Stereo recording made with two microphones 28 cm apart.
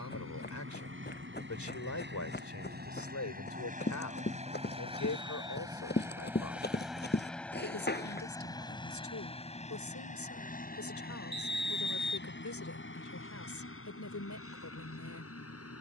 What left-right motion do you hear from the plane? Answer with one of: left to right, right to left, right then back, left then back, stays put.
right to left.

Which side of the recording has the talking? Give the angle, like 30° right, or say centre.
80° left.